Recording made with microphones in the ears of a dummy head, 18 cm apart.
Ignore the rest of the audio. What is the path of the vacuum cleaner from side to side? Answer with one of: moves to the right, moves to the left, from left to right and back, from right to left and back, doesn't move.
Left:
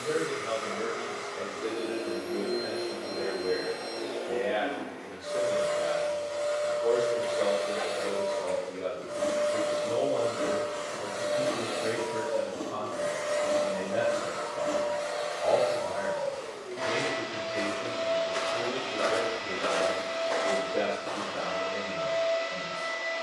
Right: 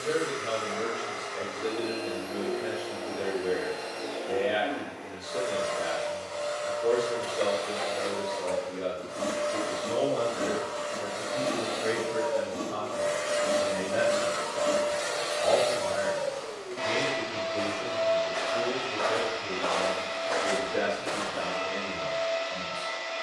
from left to right and back.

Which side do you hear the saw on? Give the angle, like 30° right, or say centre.
centre.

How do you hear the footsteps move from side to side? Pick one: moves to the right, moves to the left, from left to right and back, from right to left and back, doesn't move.
moves to the right.